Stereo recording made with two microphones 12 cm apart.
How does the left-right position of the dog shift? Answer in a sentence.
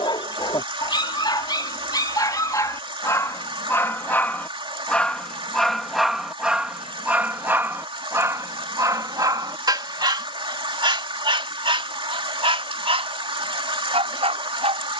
You can hear the dog move to the right.